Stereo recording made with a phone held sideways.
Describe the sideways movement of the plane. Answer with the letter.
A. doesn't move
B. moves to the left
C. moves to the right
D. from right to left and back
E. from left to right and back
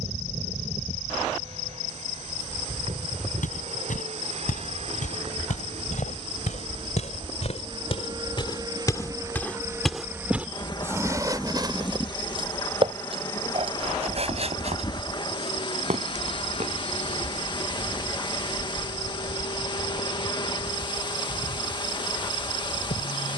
B.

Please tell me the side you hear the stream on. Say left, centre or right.
left.